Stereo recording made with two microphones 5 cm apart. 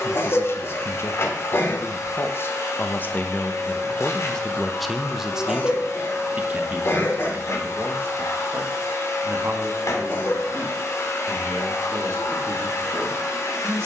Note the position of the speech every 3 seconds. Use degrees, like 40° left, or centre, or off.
50° left, 10° left, 40° right, 50° right, 60° right.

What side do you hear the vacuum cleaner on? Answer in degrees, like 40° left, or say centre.
60° left.